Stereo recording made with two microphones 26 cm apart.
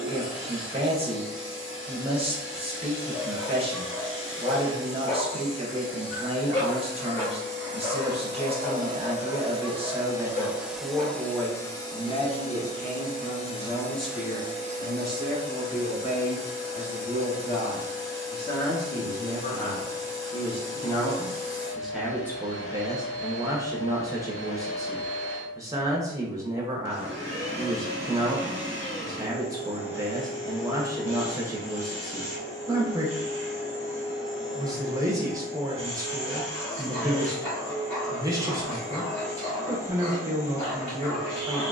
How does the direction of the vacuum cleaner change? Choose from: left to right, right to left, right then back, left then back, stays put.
left then back.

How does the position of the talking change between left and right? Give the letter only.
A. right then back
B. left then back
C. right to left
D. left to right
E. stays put
B.